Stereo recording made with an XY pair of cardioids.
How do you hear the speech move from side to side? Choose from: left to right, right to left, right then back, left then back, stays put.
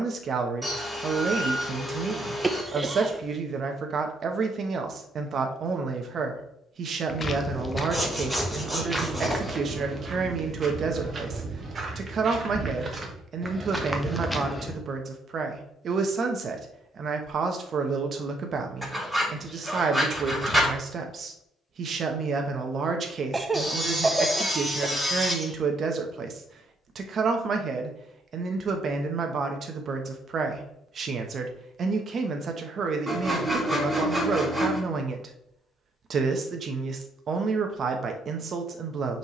stays put.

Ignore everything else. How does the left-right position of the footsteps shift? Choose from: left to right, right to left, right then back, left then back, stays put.
right then back.